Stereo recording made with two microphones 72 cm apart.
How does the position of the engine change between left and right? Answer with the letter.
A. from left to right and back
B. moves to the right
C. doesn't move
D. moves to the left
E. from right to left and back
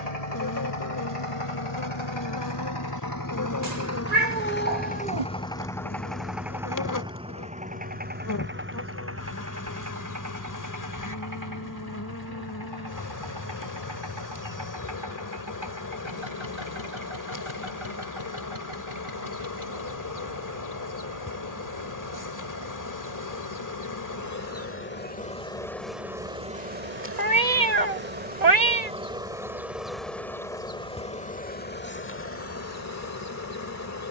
B.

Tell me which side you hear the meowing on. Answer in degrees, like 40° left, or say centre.
60° right.